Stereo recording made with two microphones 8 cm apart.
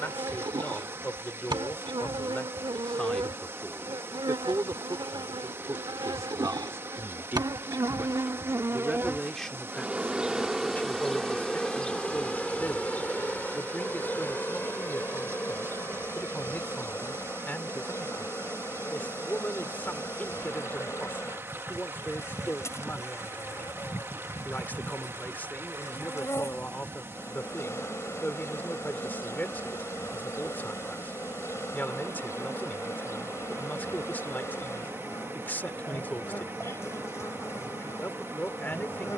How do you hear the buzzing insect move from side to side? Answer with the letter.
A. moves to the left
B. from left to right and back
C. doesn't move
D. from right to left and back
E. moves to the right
A.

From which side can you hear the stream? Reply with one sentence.
In this clip you hear the stream on the right.